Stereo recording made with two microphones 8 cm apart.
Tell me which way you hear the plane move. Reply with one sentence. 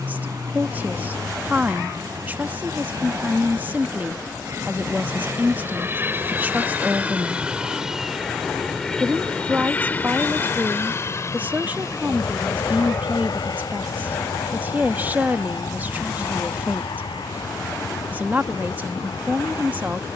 You can hear the plane move from right to left.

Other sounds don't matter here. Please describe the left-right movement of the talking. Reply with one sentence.
In this clip you hear the talking stay put.